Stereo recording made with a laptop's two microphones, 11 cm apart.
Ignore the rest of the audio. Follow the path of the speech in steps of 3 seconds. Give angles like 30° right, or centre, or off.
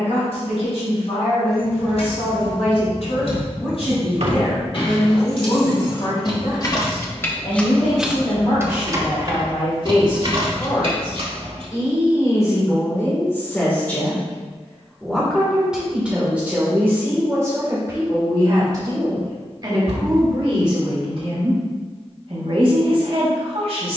70° left, 70° left, 60° left, 50° left, 20° left, 10° right, 40° right, 50° right.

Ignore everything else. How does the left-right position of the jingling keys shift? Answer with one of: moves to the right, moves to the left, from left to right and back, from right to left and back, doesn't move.
moves to the right.